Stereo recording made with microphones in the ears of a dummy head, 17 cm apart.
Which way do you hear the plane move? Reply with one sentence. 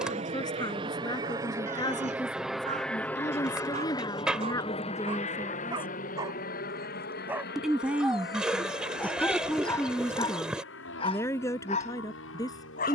In this clip you hear the plane go from the right side to the left.